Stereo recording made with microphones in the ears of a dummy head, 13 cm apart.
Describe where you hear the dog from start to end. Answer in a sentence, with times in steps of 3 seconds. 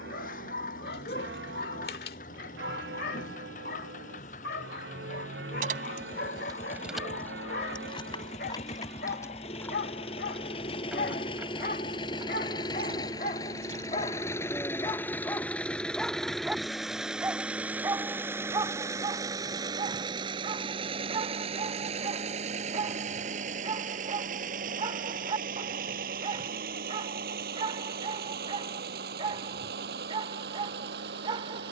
You can hear the dog on the left from 0 s, in the centre from 15 s and on the right from 18 s.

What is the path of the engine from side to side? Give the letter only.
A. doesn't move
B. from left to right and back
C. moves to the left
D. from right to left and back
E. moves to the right
E.